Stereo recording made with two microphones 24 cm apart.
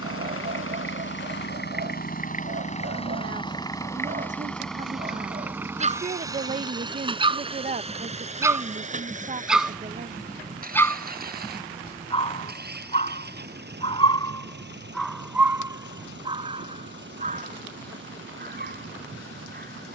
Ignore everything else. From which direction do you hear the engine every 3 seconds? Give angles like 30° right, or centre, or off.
40° left, 10° left, 20° right, 40° right, 40° right, 50° right, 50° right.